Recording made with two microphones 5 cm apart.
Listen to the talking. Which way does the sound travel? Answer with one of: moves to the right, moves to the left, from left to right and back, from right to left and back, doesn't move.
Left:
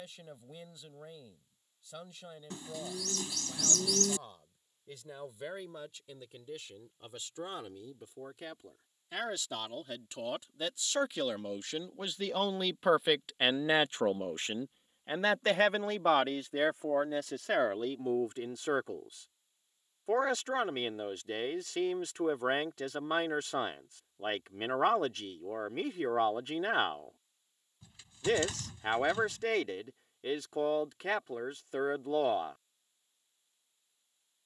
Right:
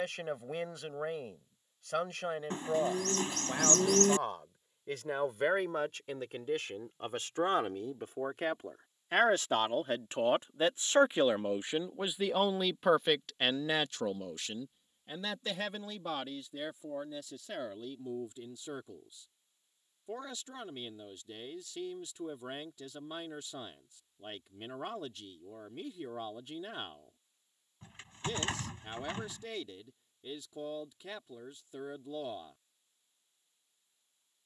moves to the left.